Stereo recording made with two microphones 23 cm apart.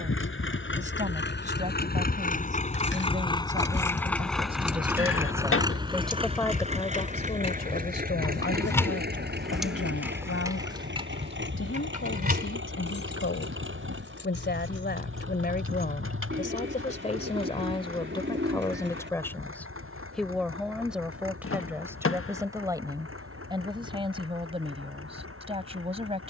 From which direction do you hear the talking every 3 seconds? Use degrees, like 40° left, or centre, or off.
30° right, 20° right, 30° left, 70° left, 60° left, 30° left, 10° left, 10° right, 20° right.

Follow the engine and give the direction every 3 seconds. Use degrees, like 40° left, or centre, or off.
50° left, centre, 30° right, 50° right, 60° right, 60° right, 60° right, 70° right, 70° right.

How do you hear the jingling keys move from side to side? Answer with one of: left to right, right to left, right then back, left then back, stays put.
left to right.